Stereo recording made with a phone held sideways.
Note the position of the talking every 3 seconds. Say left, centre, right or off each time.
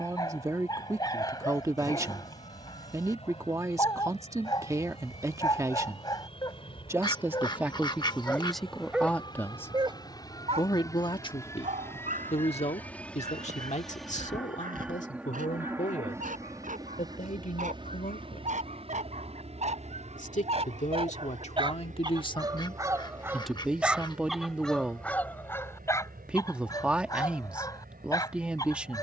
right, right, centre, left, left, left, left, left, centre, centre.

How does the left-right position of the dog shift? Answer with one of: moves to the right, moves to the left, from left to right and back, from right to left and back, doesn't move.
from left to right and back.